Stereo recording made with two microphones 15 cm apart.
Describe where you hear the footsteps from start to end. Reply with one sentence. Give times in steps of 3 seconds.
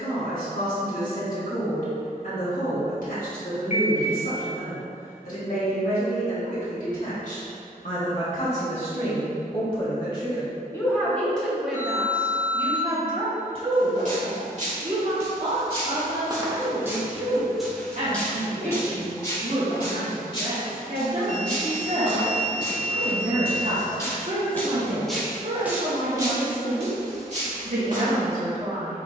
In this clip you hear the footsteps not at all from 0 s, on the right from 12 s, on the left from 18 s, in the centre from 24 s and on the right from 27 s.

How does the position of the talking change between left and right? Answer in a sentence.
In this clip you hear the talking move to the right.